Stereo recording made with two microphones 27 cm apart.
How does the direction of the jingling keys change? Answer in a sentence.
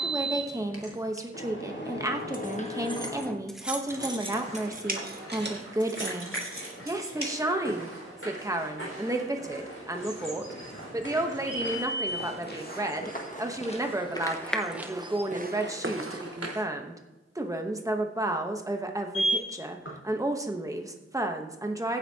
In this clip you hear the jingling keys travel towards the right.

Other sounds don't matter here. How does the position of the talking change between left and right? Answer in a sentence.
In this clip you hear the talking stay in one place.